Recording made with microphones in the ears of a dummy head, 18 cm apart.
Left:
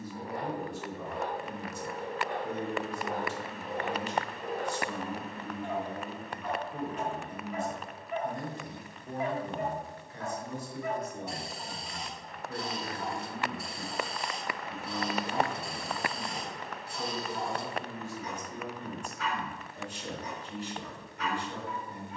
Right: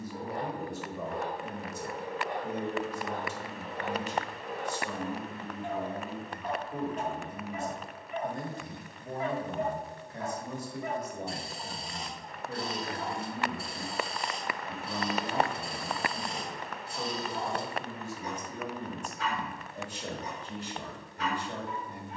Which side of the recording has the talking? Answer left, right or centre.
right.